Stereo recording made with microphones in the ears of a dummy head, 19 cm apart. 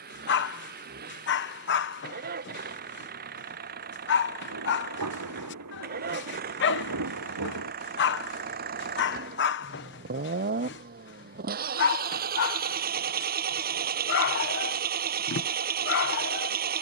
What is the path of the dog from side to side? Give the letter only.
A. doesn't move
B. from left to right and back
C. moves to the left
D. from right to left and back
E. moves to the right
A.